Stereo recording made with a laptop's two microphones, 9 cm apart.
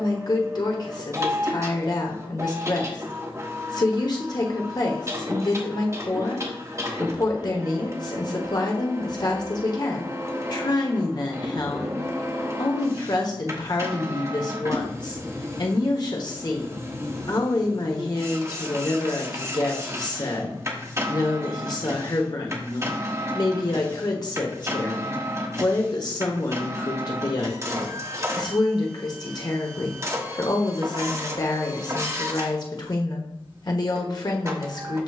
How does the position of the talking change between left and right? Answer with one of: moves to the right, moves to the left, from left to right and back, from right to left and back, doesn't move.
doesn't move.